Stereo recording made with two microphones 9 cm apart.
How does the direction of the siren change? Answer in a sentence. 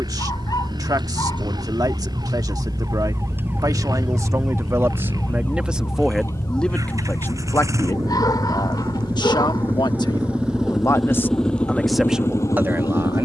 In this clip you hear the siren move from right to left.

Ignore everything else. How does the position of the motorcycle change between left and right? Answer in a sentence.
In this clip you hear the motorcycle go from the right side to the left.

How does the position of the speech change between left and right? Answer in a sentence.
In this clip you hear the speech go left and come back.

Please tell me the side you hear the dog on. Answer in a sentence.
You can hear the dog on the left.